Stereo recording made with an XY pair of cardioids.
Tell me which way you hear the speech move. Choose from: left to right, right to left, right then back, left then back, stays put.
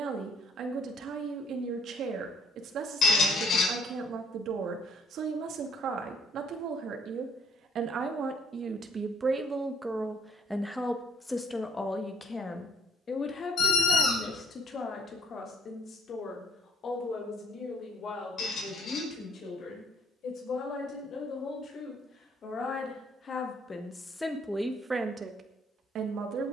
left then back.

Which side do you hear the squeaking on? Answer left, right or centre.
left.